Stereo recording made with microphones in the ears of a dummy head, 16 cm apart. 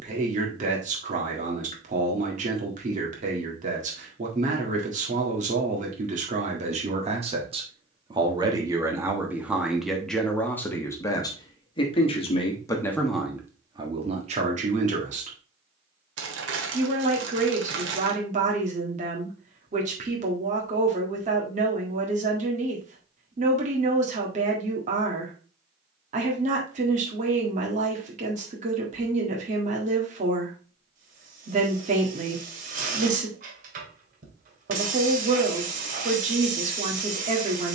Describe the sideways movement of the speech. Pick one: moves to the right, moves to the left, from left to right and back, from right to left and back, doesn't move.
from right to left and back.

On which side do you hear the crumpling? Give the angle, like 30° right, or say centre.
70° right.